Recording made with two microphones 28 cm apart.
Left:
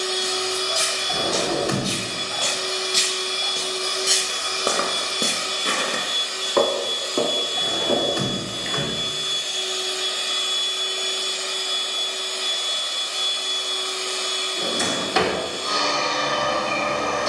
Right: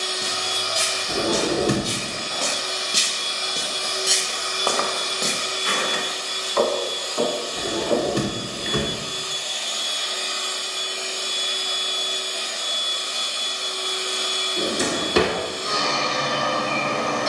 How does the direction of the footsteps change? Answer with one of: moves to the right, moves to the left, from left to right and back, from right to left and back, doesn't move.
moves to the left.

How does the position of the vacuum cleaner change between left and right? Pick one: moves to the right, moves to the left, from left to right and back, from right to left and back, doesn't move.
moves to the right.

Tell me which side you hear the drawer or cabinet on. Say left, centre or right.
right.